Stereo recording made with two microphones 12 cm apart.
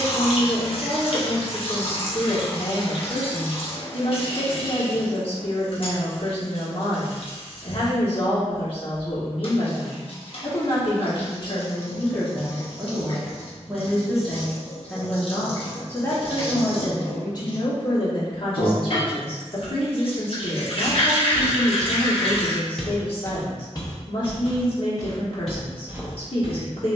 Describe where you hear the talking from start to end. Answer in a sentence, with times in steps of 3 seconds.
You can hear the talking on the left from 0 s, in the centre from 12 s and on the left from 15 s.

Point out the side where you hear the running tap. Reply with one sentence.
In this clip you hear the running tap on the left.